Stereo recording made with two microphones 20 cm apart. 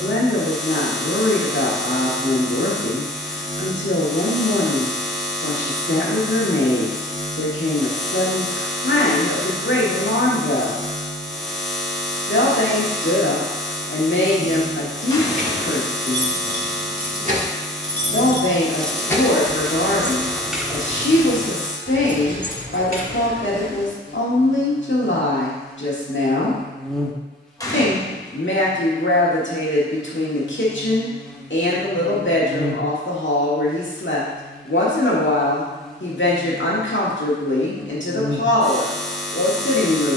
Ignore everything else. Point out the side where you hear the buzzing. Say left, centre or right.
centre.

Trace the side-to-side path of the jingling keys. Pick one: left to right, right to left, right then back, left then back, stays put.
left then back.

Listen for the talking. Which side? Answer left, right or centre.
left.